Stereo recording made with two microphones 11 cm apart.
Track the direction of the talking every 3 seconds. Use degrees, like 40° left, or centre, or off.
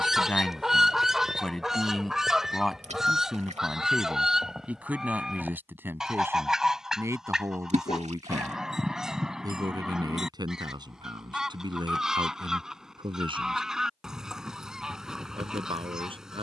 10° left, 10° right, 20° right, 40° right, 40° right, 50° right.